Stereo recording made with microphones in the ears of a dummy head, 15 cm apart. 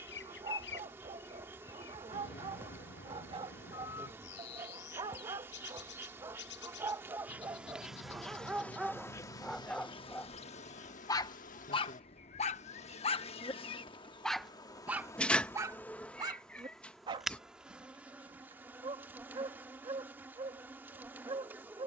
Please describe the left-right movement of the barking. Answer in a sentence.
You can hear the barking move from right to left and back again.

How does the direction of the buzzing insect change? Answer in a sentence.
You can hear the buzzing insect go left and come back.